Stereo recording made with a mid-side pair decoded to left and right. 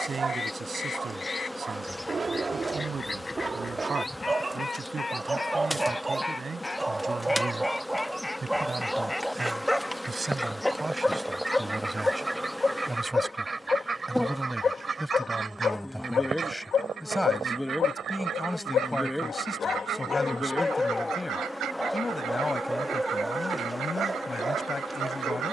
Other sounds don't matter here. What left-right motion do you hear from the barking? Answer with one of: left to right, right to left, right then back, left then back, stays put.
left then back.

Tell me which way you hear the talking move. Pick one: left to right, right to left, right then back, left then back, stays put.
right to left.